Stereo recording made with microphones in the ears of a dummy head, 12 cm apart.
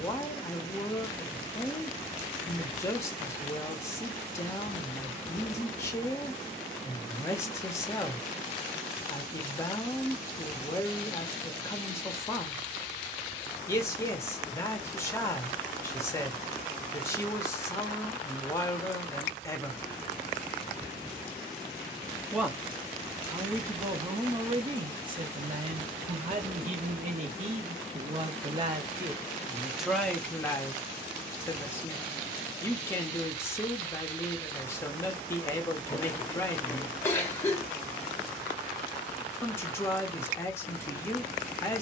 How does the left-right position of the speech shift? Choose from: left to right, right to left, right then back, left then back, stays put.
right then back.